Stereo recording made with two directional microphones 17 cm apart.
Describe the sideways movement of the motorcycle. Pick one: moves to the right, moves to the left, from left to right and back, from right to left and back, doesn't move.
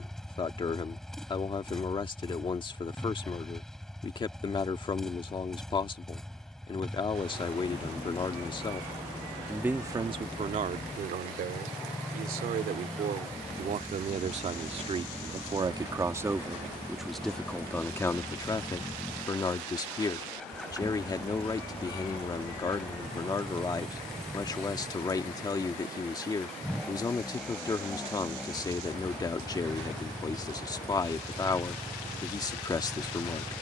doesn't move.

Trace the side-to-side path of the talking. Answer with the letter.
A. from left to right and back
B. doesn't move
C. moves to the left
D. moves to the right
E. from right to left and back
A.